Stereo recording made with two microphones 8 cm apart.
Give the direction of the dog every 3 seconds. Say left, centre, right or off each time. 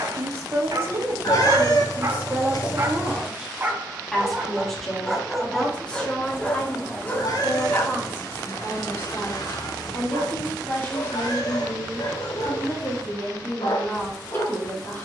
right, centre, left, left, left.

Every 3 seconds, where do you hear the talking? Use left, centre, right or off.
right, centre, left, left, left.